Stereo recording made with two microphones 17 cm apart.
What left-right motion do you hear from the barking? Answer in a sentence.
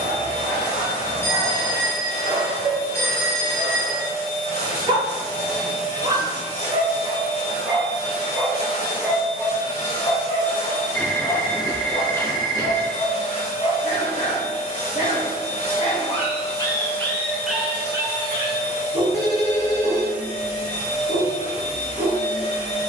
You can hear the barking go left and come back.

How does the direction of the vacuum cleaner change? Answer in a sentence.
In this clip you hear the vacuum cleaner stay put.